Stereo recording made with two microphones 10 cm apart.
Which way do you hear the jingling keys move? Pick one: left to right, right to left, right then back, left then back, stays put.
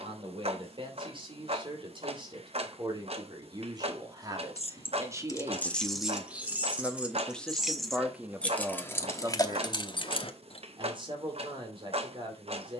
right then back.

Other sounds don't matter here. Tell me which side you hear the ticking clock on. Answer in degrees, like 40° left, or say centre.
60° right.